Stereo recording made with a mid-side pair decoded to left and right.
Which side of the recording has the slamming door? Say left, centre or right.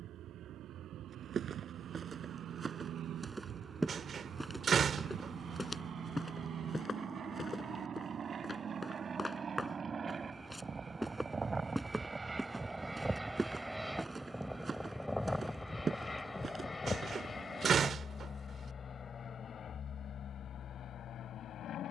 right.